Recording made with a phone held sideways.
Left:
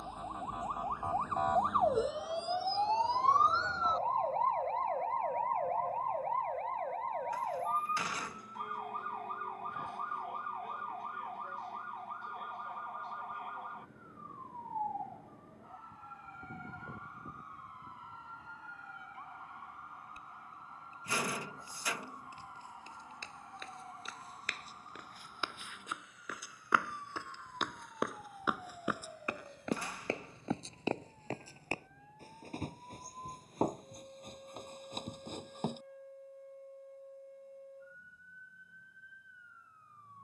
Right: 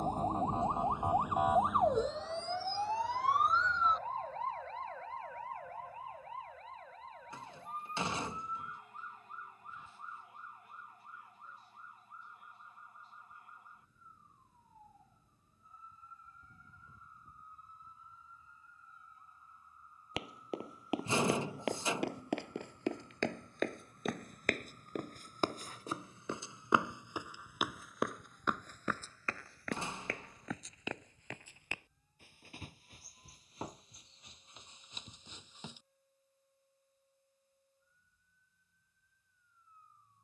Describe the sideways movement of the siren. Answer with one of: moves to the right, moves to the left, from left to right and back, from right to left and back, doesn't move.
moves to the left.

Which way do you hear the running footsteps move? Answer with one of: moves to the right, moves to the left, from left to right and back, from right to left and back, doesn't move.
moves to the left.